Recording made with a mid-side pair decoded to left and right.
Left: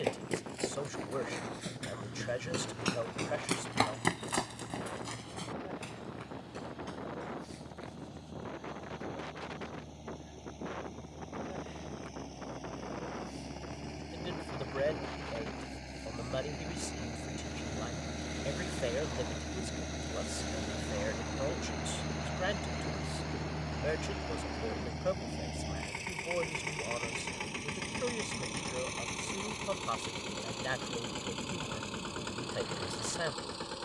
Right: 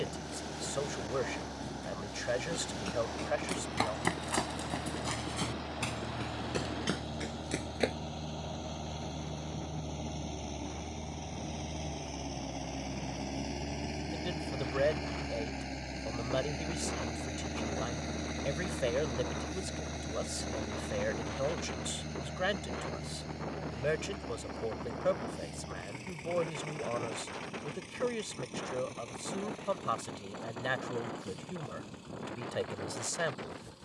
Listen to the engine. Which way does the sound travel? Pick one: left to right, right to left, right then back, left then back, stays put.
right to left.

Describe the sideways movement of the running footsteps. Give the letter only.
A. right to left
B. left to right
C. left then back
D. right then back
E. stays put
B.